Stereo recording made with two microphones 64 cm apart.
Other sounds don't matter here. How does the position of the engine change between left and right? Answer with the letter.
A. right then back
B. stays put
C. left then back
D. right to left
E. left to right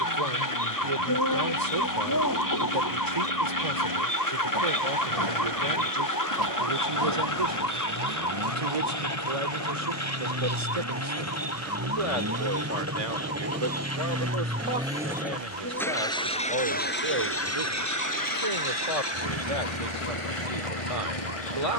D.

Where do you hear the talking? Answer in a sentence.
You can hear the talking on the right.